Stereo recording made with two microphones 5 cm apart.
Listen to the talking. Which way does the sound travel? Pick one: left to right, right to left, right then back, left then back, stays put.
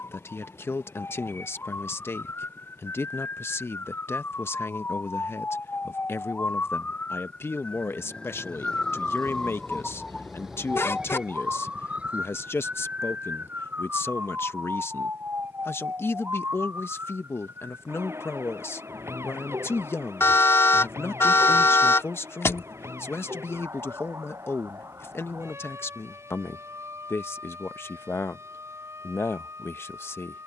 stays put.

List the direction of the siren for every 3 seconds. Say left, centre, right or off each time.
left, left, left, centre, right, right, right, right, right, right.